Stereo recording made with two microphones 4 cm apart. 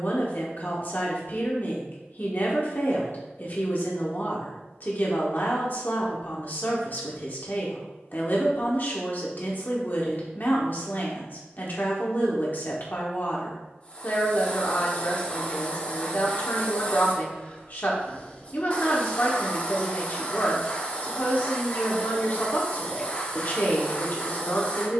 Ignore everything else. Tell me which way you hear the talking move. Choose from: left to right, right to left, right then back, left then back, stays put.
stays put.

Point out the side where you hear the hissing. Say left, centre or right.
left.